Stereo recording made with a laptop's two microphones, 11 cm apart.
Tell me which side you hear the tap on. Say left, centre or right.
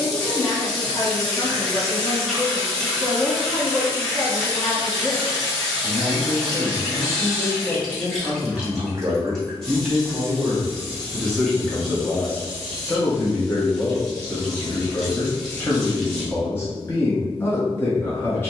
centre.